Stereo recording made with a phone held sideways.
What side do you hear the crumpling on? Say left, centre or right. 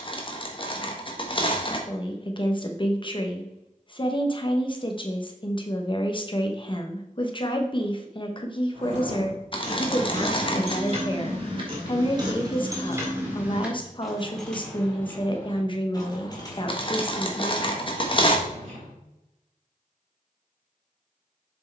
left.